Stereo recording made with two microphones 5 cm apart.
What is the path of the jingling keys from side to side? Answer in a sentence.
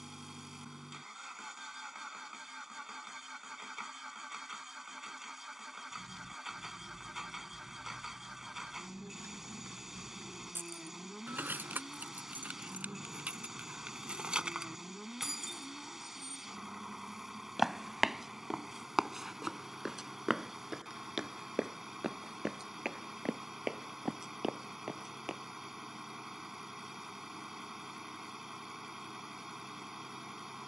You can hear the jingling keys move from left to right and back again.